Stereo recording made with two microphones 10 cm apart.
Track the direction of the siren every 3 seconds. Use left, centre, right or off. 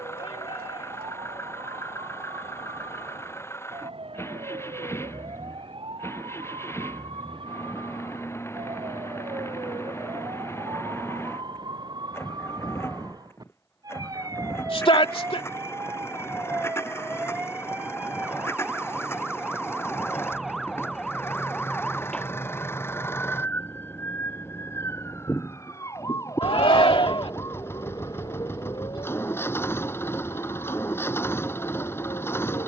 right, right, right, right, right, right, centre, centre, left, left, left.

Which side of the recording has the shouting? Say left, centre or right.
left.